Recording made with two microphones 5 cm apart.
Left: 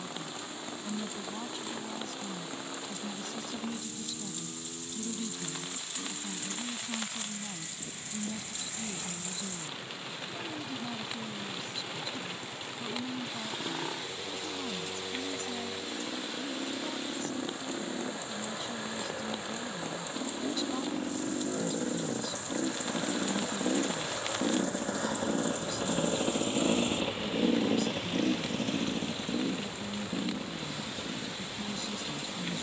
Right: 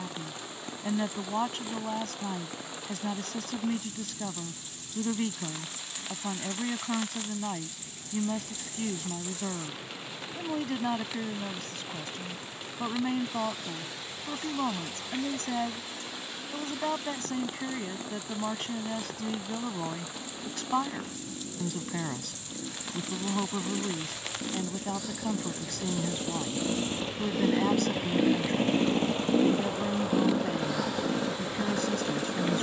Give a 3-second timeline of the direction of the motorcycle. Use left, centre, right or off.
left, left, left, left, left, left, left, left, left, right, right.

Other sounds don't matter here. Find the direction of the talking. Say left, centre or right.
right.